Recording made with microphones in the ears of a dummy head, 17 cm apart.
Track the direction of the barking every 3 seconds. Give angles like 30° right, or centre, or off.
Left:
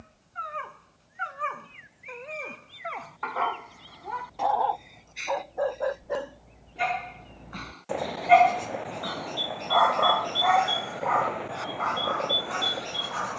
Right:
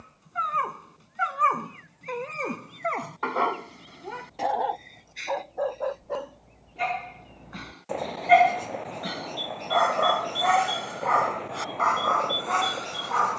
70° right, 20° right, centre, 40° right, 70° right.